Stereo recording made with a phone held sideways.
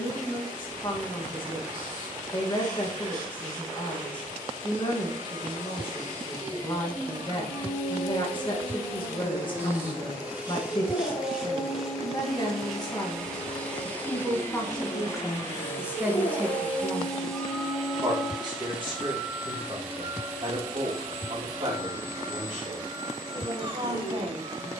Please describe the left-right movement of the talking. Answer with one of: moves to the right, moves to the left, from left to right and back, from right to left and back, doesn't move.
moves to the right.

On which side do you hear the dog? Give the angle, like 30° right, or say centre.
60° left.